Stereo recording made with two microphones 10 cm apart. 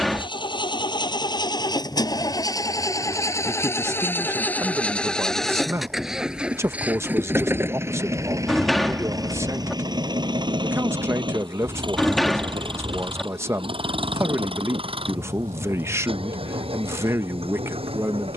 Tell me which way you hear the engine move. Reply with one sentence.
You can hear the engine travel towards the right.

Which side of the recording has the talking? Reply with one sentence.
You can hear the talking on the right.